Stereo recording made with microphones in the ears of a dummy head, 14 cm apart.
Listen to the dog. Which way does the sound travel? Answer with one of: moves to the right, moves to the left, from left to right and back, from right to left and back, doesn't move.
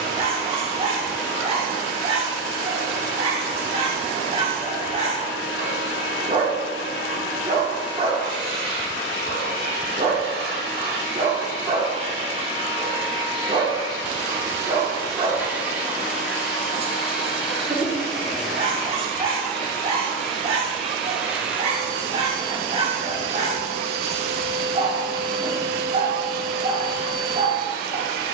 doesn't move.